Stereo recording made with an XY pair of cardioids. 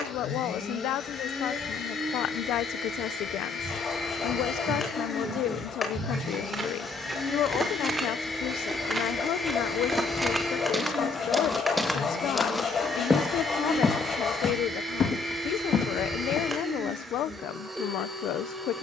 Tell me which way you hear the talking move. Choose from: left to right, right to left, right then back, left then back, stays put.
stays put.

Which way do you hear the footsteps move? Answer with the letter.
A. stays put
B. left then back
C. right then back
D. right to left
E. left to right
D.